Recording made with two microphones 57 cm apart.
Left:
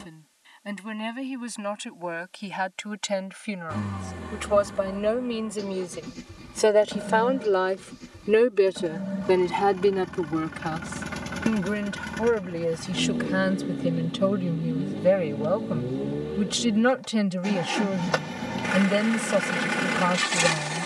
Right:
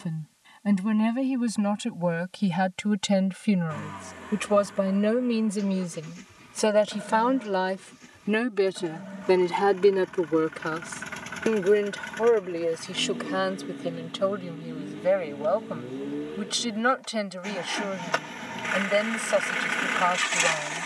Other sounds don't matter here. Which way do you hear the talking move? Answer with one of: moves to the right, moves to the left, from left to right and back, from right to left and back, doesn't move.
moves to the left.